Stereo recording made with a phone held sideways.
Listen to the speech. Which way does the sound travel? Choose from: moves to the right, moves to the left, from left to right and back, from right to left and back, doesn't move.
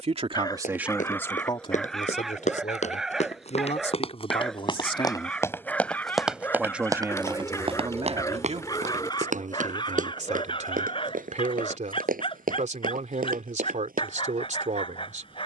from right to left and back.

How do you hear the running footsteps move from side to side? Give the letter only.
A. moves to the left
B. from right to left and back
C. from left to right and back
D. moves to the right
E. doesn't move
D.